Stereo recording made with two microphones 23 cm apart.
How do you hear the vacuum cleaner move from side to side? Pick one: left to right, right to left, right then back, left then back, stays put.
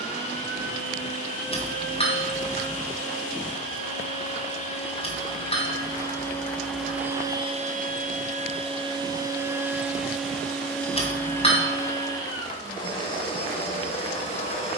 right then back.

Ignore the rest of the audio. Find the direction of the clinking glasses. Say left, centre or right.
left.